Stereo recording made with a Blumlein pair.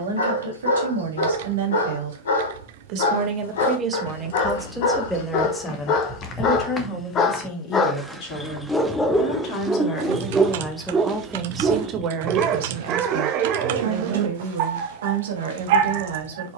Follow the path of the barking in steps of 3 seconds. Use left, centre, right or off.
left, left, left, centre, right, right.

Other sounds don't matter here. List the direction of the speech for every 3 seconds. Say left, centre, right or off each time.
right, centre, left, centre, right, right.